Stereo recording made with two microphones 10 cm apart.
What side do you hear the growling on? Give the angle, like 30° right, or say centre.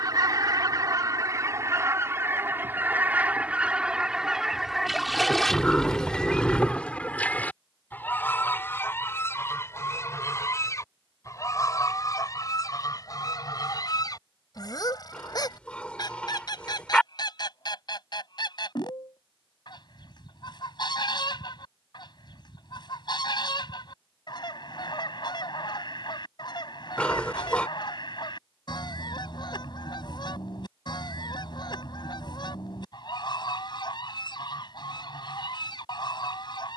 10° left.